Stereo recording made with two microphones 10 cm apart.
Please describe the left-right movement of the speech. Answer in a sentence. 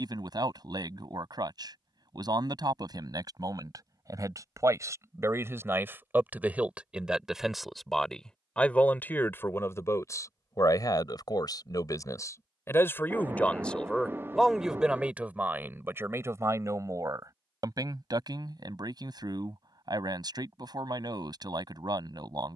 In this clip you hear the speech move from right to left and back again.